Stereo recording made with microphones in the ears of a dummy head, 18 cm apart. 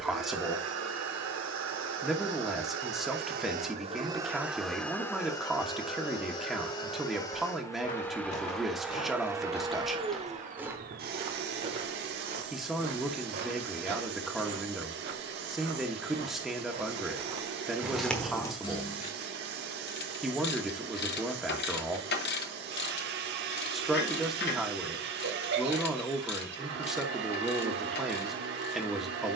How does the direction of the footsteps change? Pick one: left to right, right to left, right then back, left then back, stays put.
right then back.